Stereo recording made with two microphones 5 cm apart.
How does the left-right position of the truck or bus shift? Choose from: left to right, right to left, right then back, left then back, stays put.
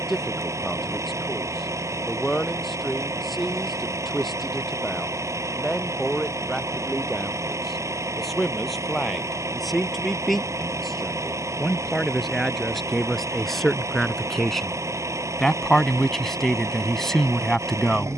stays put.